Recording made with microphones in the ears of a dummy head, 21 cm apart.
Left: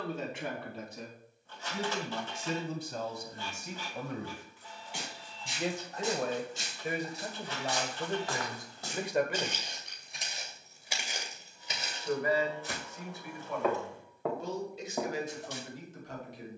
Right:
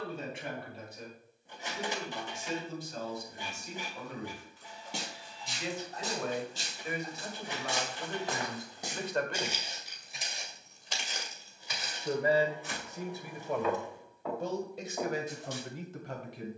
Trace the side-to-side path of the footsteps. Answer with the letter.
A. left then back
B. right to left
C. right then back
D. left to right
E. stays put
B.